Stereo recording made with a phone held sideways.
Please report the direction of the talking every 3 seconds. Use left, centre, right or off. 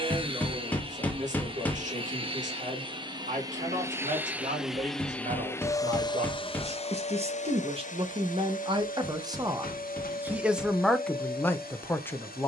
right, right, right, centre.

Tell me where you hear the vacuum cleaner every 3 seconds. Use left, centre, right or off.
right, centre, left, left.